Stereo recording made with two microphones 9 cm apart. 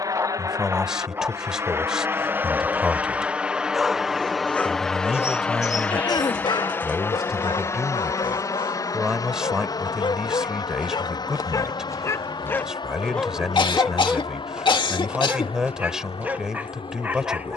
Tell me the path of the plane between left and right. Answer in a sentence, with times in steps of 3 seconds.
You can hear the plane on the right from 0 s, in the centre from 3 s and on the left from 6 s.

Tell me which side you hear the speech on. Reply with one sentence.
In this clip you hear the speech in the centre.